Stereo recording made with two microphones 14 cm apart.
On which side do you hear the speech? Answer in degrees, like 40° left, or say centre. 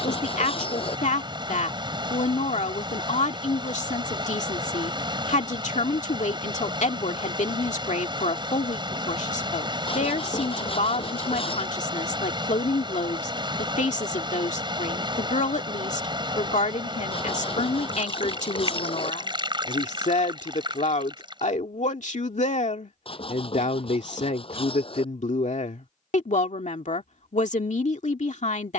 60° left.